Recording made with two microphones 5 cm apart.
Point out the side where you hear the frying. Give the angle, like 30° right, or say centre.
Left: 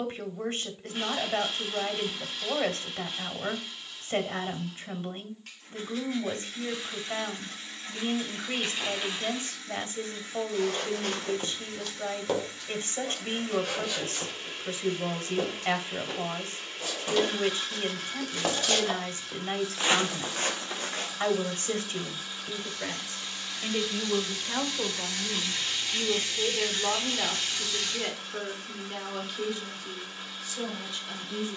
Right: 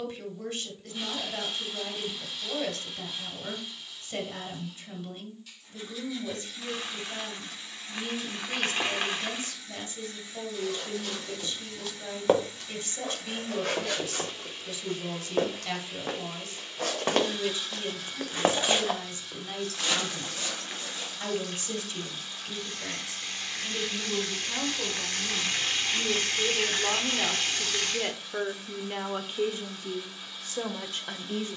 60° right.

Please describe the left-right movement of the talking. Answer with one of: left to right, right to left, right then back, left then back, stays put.
left to right.